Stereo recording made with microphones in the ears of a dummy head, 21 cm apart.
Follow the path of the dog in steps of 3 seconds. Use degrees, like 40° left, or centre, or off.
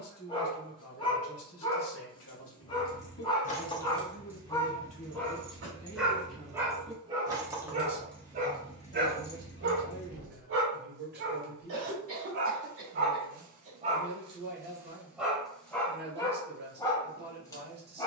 20° left, 10° left, 20° right, 50° right, 40° right, 10° left.